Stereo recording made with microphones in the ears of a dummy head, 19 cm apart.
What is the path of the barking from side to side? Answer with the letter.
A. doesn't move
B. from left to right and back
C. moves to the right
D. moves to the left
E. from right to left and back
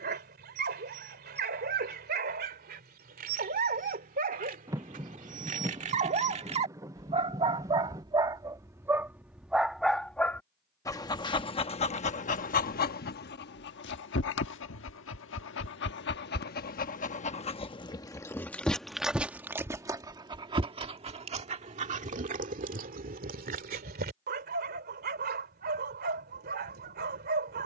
E.